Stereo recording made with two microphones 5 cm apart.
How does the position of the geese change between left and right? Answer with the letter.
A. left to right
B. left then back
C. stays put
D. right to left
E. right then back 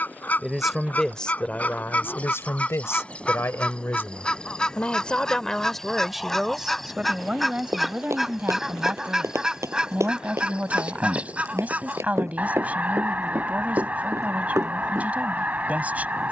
A.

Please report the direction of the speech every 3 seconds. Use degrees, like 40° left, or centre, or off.
30° left, 30° left, 20° right, 30° right, 30° right, 30° right.